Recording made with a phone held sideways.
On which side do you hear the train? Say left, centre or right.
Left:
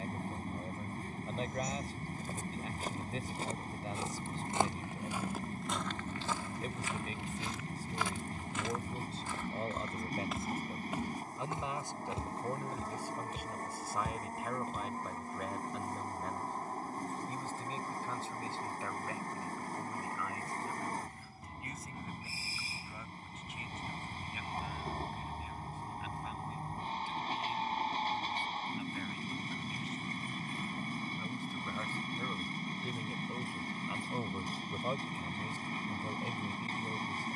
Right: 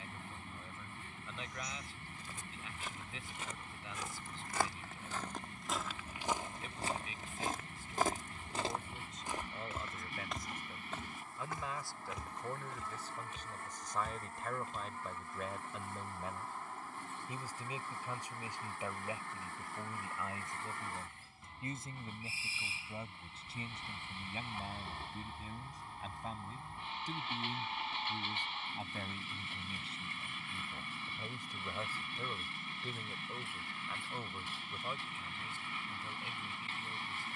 left.